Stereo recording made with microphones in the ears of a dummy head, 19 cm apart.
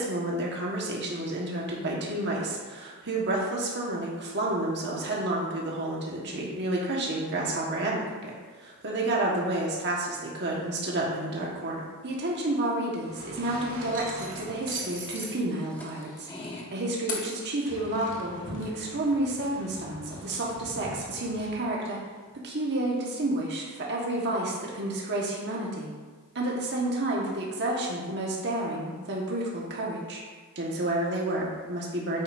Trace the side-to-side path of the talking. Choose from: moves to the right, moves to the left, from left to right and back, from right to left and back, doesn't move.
doesn't move.